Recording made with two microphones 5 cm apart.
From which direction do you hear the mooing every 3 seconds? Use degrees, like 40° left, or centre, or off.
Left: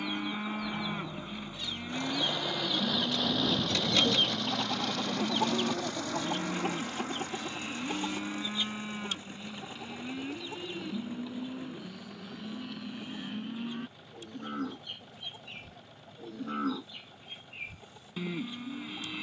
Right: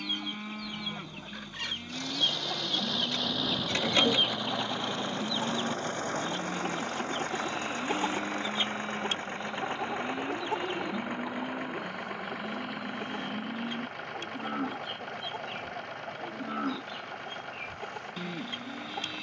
20° left, 10° left, centre, centre, 10° right, centre, 10° left.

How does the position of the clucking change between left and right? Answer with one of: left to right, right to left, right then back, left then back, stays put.
left then back.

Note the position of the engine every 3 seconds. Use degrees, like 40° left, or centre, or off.
30° left, 20° right, 50° right, 70° right, 80° right, 80° right, 80° right.